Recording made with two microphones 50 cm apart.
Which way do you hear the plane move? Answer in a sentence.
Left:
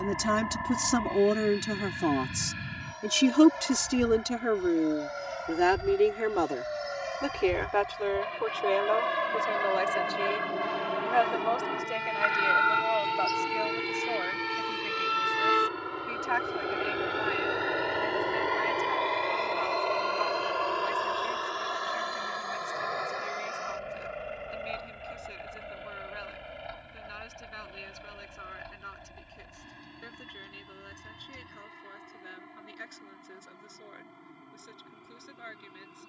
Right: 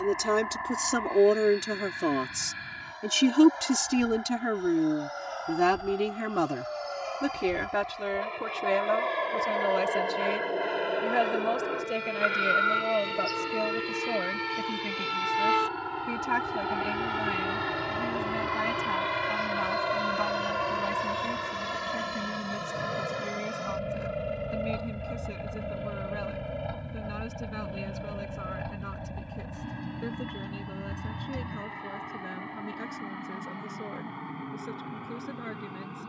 You can hear the plane move to the right.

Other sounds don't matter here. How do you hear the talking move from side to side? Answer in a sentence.
You can hear the talking go from the left side to the right.